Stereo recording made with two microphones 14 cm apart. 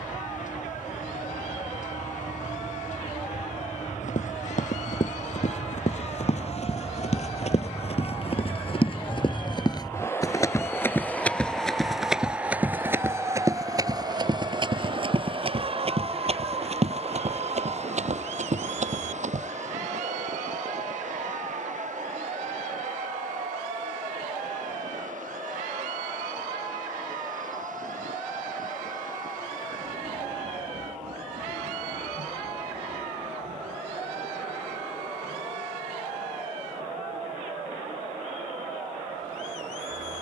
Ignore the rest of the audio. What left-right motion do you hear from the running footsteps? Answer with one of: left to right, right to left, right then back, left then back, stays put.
left to right.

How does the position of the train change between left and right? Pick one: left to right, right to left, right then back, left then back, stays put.
left to right.